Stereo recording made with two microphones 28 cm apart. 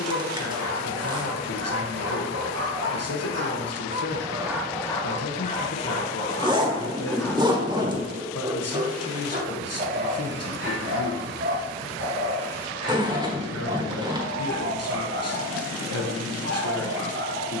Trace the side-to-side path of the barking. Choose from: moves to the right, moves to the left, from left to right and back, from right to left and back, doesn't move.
from right to left and back.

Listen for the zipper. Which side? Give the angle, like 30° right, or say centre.
20° right.